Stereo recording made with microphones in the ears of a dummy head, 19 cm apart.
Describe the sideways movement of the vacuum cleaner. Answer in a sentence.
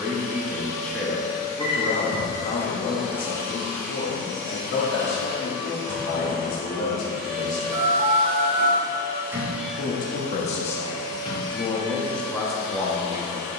In this clip you hear the vacuum cleaner go right and come back.